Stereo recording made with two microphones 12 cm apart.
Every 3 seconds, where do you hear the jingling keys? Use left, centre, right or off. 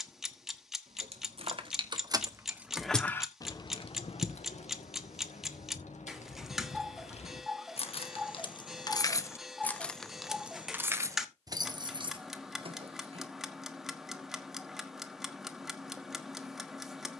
right, left, left, centre, right, off.